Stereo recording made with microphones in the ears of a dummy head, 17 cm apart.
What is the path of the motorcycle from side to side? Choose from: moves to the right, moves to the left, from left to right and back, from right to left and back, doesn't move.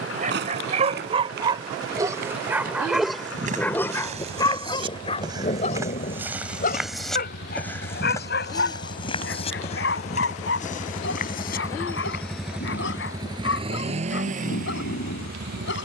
moves to the right.